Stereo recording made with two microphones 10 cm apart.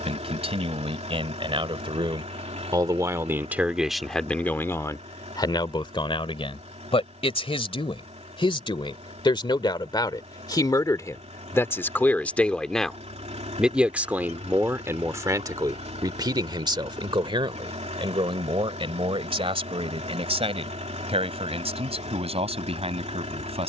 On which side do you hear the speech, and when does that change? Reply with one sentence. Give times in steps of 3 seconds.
You can hear the speech on the right from 0 s, in the centre from 3 s, on the left from 6 s, in the centre from 12 s and on the right from 15 s.